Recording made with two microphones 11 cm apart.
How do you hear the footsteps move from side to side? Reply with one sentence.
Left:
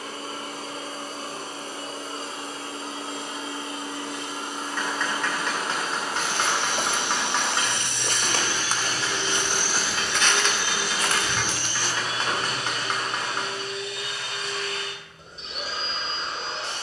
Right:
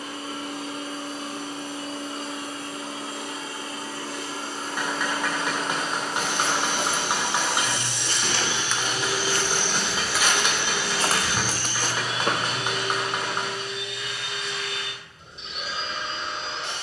You can hear the footsteps move to the right.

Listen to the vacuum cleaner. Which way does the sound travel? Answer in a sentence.
You can hear the vacuum cleaner go right and come back.